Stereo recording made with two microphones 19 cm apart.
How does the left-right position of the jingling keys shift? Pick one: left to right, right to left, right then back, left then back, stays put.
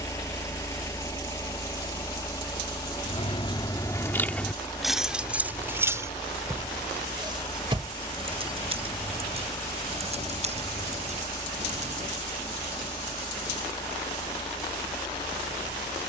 left to right.